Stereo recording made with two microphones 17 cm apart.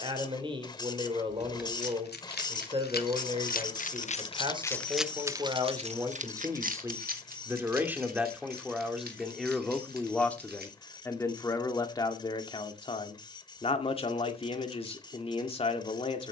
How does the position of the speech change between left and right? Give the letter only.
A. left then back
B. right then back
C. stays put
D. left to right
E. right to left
E.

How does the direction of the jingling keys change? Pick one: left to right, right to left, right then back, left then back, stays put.
left to right.